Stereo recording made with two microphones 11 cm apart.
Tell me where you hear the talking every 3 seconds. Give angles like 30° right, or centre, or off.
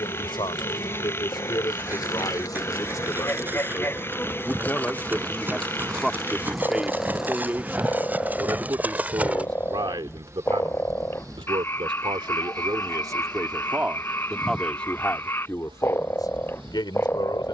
40° left, 20° left, 20° right, 50° right, 20° right, 40° left.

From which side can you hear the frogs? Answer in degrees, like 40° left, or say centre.
20° left.